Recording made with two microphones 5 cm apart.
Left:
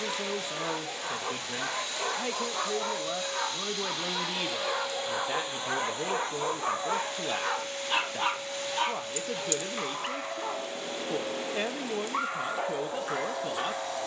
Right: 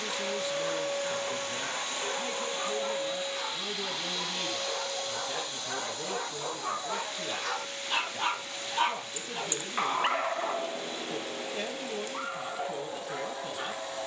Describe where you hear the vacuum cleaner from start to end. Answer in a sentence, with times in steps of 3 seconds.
You can hear the vacuum cleaner on the right from 0 s, in the centre from 3 s and on the left from 6 s.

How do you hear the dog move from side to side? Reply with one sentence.
In this clip you hear the dog move from left to right and back again.